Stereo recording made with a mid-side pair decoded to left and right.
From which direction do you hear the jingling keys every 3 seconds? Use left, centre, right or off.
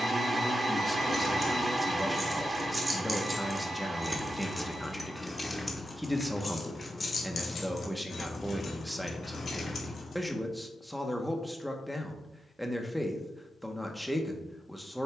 right, centre, left, left, off.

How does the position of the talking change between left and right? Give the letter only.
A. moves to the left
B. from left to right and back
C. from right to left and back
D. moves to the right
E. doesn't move
E.